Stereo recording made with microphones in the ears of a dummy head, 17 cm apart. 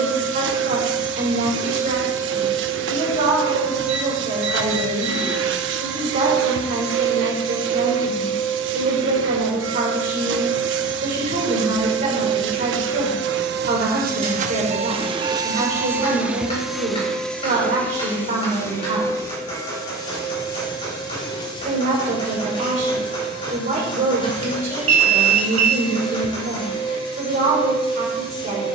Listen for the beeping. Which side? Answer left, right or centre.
right.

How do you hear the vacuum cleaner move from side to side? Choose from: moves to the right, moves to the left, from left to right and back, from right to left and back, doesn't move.
moves to the left.